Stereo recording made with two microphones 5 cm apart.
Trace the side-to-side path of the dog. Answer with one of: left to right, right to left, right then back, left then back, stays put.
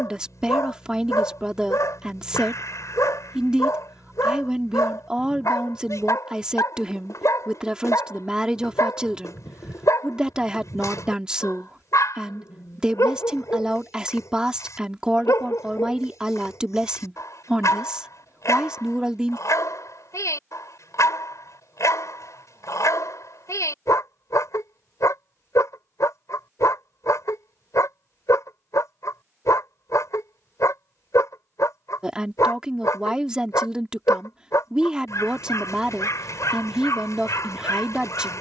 stays put.